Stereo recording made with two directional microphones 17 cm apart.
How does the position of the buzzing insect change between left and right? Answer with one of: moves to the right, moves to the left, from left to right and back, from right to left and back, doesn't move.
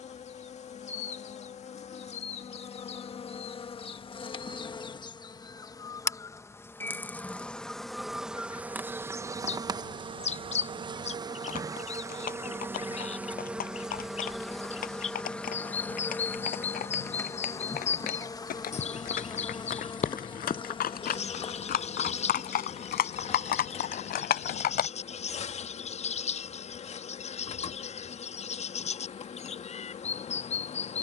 from left to right and back.